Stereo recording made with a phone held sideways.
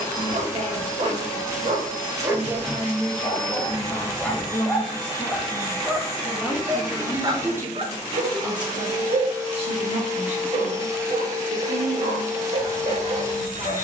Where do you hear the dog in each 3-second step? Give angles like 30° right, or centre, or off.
40° right, 10° left, 40° right, 50° right, 50° right.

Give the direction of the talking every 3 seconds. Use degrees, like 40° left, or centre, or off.
30° right, 20° left, 20° right, 40° right, 50° right.